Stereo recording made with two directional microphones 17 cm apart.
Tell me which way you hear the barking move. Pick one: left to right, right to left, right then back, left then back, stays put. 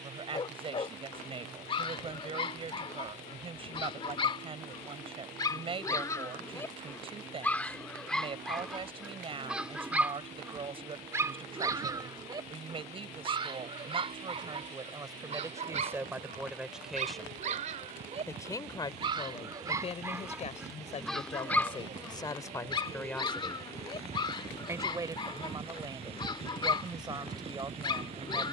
right then back.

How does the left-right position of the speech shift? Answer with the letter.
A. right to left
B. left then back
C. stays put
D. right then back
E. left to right
B.